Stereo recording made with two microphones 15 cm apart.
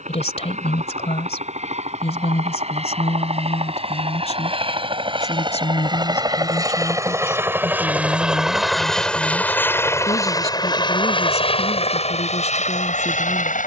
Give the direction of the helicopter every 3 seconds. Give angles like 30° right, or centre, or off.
50° right, 40° right, 10° right, 20° left, 50° left.